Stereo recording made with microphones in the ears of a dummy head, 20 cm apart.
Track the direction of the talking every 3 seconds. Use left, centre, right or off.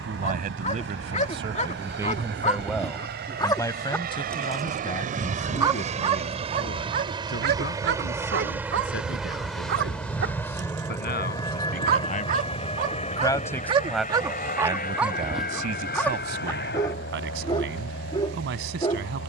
right, left, left, left, centre, right, right.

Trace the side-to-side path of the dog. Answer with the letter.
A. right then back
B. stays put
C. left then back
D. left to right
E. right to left
A.